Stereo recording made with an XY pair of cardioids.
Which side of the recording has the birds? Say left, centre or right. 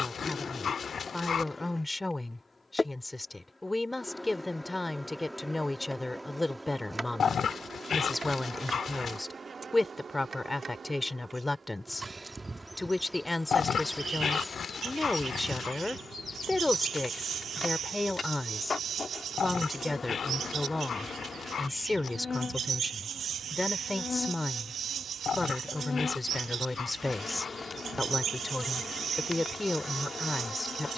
right.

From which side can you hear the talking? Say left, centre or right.
centre.